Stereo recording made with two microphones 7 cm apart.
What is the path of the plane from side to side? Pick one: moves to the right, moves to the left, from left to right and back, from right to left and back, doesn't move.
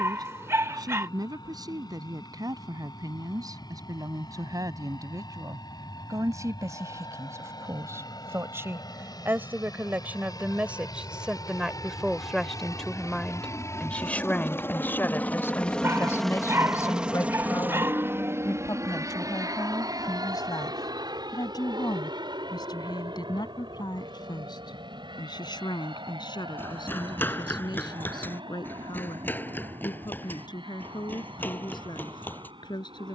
moves to the right.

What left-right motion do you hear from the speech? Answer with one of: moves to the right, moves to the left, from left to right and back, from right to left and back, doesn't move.
moves to the left.